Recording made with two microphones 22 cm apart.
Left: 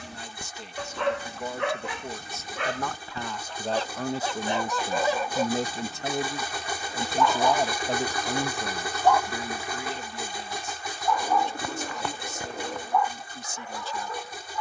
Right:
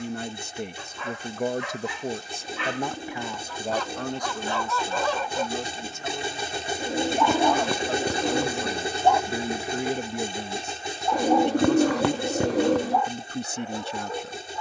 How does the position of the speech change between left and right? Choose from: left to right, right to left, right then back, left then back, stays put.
left then back.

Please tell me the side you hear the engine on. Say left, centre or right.
right.